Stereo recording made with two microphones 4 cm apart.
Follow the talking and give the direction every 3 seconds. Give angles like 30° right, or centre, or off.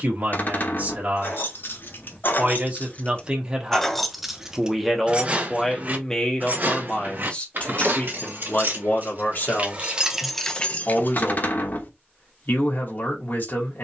40° right, 10° right, 30° left, 50° left, 50° left.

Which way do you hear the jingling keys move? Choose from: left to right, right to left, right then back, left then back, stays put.
right then back.